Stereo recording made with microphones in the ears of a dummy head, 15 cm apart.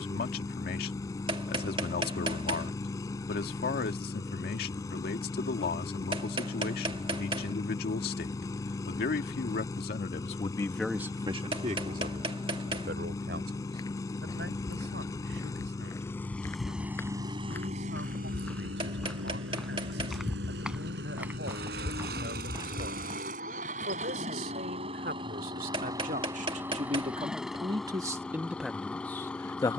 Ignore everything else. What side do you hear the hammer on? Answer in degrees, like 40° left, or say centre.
30° right.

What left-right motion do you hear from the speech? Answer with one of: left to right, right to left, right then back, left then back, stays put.
right then back.